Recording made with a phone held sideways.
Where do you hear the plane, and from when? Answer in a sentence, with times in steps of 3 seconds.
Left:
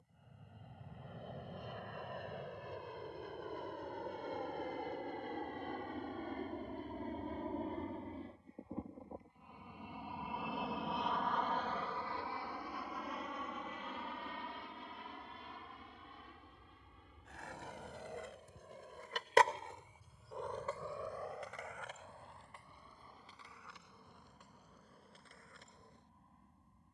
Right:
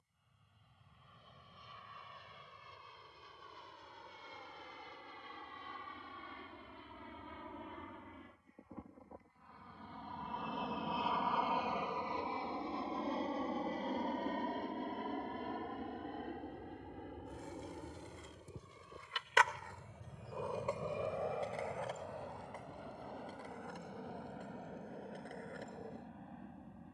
In this clip you hear the plane on the left from 0 s, in the centre from 9 s and on the right from 12 s.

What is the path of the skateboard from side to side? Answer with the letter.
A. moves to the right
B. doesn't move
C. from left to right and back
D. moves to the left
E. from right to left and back
A.